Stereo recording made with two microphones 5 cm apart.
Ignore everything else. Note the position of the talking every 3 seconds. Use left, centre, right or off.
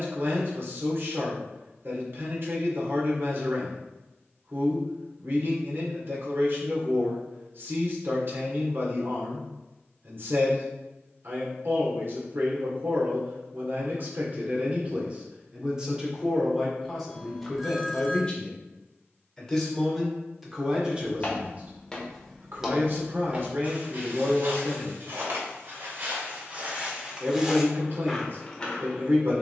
right, right, right, right, right, centre, centre, right, right, right.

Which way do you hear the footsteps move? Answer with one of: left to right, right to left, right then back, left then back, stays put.
right then back.